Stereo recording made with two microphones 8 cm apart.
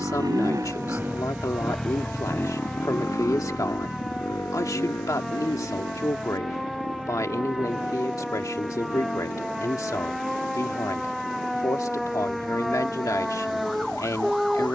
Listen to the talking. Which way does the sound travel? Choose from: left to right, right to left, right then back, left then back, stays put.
stays put.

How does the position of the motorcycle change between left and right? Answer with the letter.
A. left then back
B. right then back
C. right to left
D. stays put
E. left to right
C.